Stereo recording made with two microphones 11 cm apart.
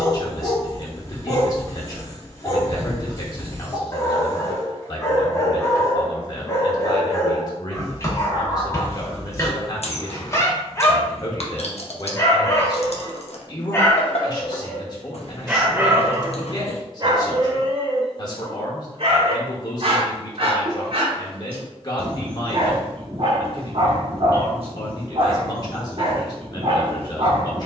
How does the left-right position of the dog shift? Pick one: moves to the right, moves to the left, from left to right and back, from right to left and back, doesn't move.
moves to the right.